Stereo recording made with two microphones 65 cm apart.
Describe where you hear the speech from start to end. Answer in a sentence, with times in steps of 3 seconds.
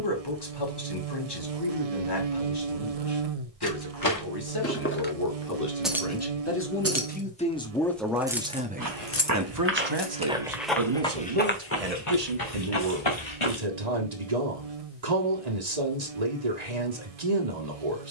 In this clip you hear the speech on the left from 0 s, in the centre from 6 s and on the right from 9 s.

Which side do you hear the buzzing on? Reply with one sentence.
You can hear the buzzing on the right.